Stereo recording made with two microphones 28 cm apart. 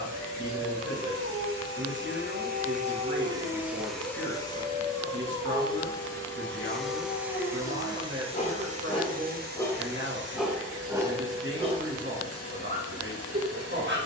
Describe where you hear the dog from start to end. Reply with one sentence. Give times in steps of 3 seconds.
In this clip you hear the dog on the right from 0 s, in the centre from 3 s, on the left from 6 s, in the centre from 9 s and on the right from 12 s.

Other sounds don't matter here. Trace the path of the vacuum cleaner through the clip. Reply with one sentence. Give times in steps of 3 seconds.
You can hear the vacuum cleaner on the right from 0 s, in the centre from 3 s and on the right from 9 s.